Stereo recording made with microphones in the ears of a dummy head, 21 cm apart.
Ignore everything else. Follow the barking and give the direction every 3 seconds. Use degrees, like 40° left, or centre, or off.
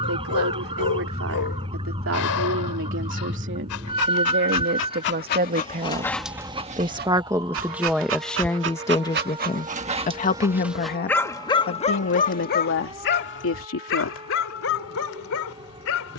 70° left, 50° left, 40° right, 10° right, 50° left, 60° left.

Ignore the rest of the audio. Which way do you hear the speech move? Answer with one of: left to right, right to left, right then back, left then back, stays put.
right to left.